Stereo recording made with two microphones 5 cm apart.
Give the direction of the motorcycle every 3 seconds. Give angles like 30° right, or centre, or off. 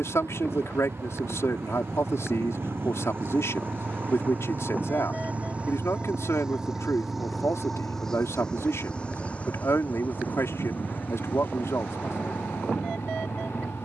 60° right, 40° right, centre, 40° left, 50° left.